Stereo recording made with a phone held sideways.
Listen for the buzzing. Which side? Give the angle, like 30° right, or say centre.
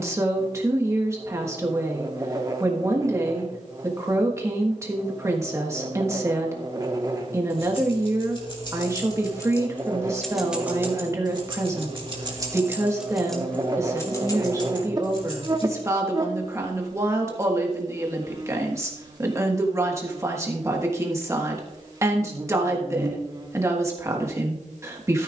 30° right.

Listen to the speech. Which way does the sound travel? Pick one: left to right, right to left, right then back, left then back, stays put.
stays put.